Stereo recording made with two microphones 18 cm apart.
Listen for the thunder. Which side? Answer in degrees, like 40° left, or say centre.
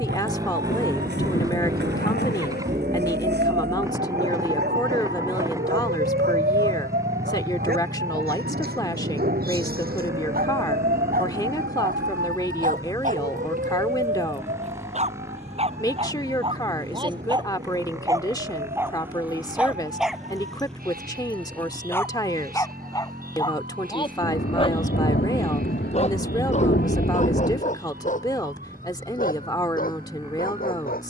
60° left.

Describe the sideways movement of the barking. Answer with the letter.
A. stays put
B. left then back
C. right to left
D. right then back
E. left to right
C.